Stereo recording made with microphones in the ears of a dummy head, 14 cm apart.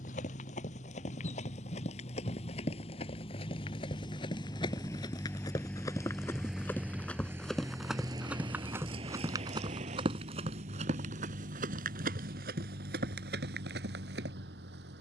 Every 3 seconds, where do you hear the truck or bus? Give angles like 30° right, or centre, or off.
40° left, 20° left, 10° right, 50° right, 70° right.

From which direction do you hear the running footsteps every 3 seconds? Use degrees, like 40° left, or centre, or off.
40° left, 30° left, centre, 40° right, 60° right.